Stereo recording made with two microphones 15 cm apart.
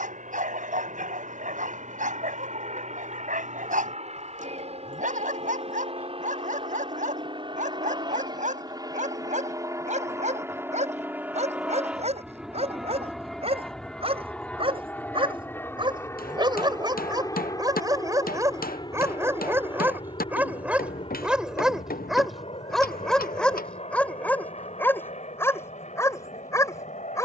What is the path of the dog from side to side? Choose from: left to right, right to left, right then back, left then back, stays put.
right to left.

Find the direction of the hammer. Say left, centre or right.
left.